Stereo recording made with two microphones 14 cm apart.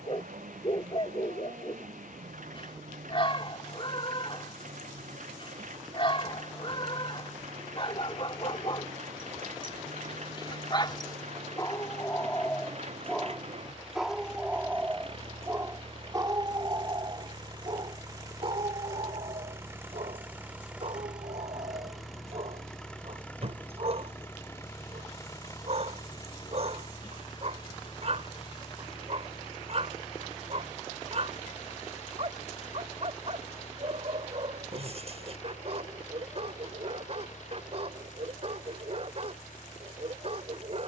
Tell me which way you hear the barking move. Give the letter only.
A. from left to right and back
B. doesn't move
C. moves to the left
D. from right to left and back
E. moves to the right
E.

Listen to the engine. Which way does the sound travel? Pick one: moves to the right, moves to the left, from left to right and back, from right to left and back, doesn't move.
moves to the left.